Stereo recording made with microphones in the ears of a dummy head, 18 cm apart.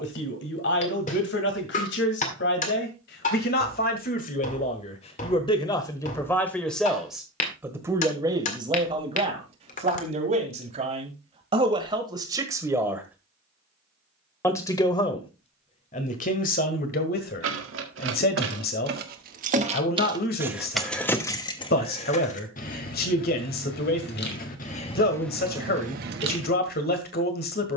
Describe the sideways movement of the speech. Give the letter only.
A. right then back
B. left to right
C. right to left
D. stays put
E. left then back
A.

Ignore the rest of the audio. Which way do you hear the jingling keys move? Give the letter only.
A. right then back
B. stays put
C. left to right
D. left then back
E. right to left
D.